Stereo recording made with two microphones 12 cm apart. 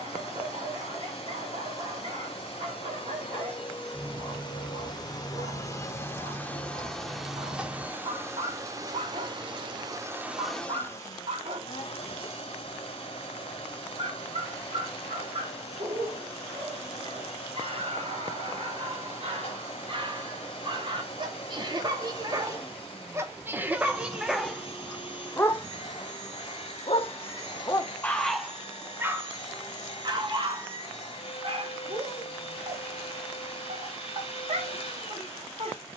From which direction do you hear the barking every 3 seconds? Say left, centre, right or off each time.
right, right, right, right, right, right, right, right, centre, centre, right, right.